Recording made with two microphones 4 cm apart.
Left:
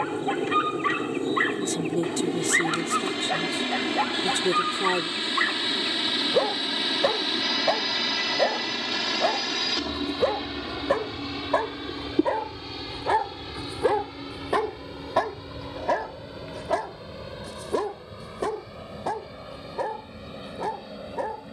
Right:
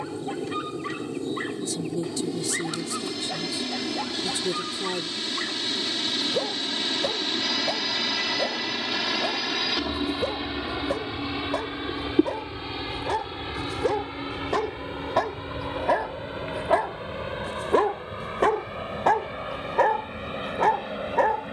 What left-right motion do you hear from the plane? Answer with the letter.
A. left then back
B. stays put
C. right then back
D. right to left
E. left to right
E.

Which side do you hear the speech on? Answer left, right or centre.
left.